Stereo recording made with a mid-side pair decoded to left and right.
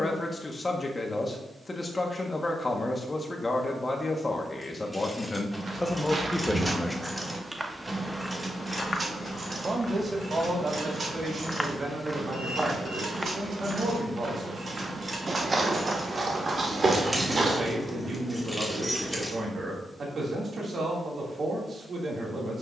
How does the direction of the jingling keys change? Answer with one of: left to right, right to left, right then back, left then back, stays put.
right then back.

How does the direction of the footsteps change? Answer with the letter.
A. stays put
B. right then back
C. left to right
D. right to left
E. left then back
E.